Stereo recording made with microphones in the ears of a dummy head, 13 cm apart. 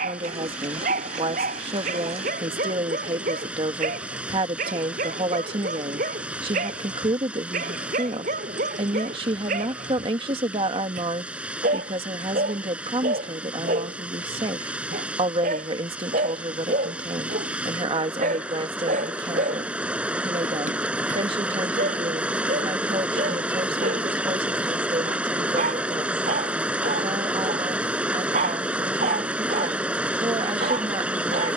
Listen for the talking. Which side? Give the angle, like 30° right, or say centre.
40° right.